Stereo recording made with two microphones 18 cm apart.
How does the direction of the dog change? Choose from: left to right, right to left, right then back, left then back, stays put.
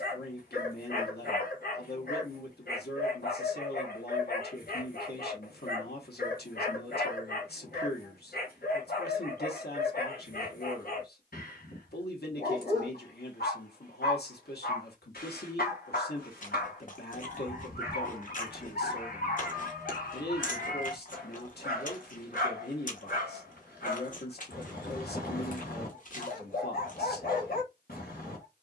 stays put.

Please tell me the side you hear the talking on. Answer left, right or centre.
left.